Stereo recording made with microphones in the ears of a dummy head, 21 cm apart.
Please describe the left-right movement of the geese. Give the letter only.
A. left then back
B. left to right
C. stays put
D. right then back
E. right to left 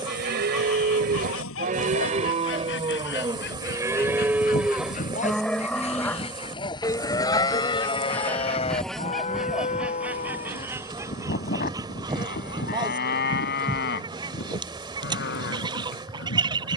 B.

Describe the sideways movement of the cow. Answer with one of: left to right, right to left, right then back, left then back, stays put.
right to left.